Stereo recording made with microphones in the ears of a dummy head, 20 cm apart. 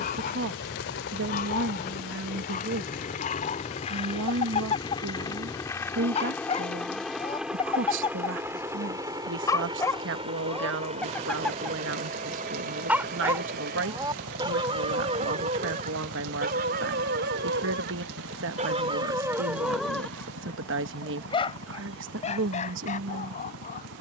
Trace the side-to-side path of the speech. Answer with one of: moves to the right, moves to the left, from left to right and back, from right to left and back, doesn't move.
doesn't move.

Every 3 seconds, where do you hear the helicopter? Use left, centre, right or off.
left, left, centre, right, right, right, right, right.